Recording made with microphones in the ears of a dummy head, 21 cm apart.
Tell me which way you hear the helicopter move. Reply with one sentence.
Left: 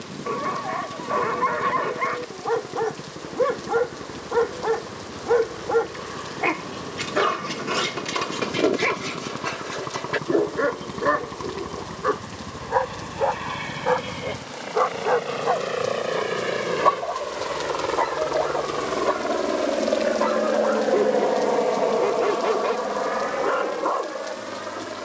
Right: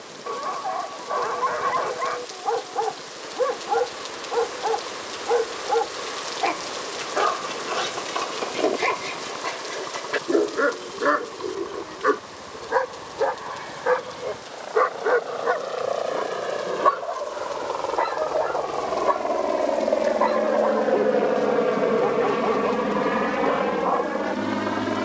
You can hear the helicopter go from the left side to the right.